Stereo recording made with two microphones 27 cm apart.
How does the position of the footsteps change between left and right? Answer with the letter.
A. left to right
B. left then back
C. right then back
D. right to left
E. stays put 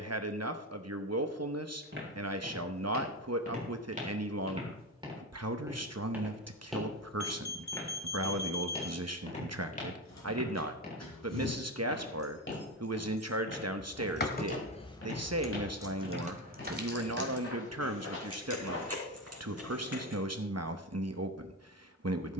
D.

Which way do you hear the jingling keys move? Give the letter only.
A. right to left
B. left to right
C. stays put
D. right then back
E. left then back
B.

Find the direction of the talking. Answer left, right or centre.
right.